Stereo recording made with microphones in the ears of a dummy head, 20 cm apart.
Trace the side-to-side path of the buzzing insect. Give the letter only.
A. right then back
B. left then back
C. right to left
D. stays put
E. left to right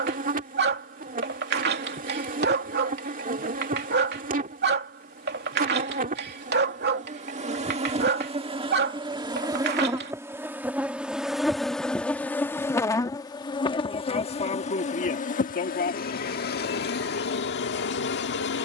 C.